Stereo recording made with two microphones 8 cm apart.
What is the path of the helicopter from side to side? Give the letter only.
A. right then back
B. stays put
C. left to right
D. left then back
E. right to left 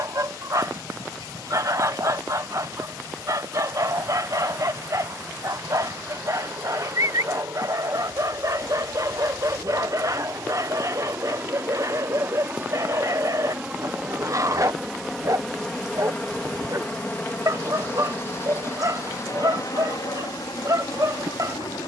E.